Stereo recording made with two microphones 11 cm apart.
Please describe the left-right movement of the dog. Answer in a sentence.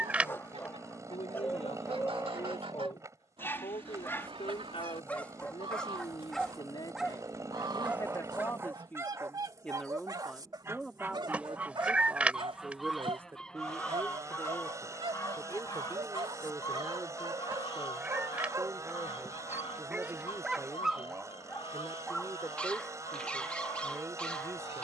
You can hear the dog go right and come back.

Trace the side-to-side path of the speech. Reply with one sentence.
You can hear the speech move from left to right.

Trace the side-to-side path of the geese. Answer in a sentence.
You can hear the geese travel towards the left.